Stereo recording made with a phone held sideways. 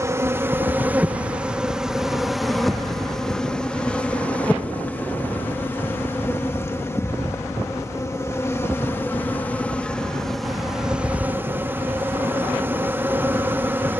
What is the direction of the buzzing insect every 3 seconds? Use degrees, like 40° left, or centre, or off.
10° right, 10° left, 20° left, centre, 10° right.